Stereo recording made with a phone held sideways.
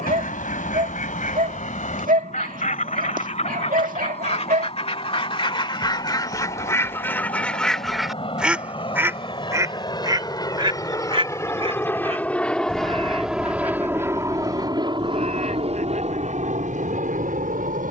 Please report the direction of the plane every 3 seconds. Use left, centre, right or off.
left, left, left, left, centre, right.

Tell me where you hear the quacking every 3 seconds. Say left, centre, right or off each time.
left, left, centre, right, right, right.